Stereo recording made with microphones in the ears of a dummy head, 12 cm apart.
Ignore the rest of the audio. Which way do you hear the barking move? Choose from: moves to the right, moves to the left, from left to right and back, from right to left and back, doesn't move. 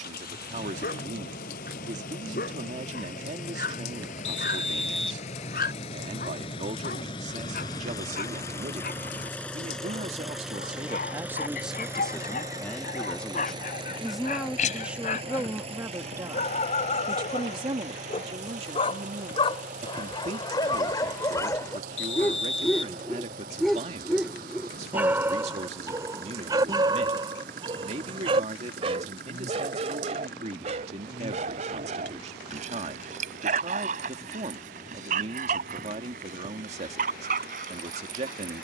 moves to the right.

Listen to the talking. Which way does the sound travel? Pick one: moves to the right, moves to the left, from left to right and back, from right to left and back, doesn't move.
from right to left and back.